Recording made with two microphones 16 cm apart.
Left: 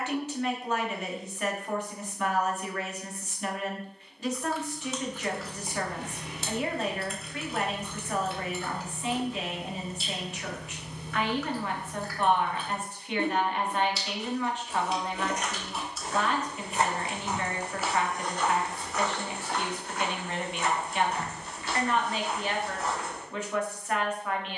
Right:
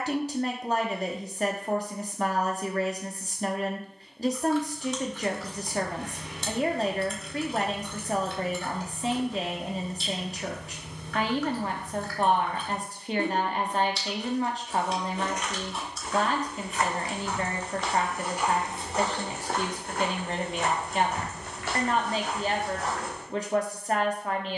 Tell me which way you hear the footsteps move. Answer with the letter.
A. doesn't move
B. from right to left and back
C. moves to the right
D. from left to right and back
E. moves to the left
C.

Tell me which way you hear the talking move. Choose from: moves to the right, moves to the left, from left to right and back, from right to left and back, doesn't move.
doesn't move.